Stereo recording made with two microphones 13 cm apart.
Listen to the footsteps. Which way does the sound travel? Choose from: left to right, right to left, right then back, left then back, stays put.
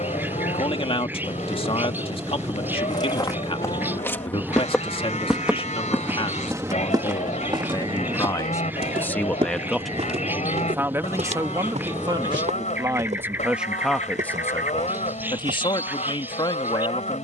left to right.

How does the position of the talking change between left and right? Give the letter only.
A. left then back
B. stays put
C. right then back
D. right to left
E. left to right
C.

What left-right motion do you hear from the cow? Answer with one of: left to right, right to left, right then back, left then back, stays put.
stays put.